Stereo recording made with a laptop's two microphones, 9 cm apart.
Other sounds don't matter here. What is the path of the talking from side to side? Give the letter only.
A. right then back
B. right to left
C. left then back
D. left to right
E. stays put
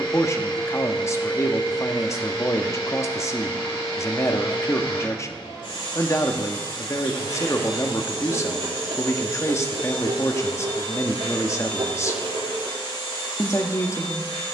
E.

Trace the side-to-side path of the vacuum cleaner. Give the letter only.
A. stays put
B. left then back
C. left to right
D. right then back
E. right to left
A.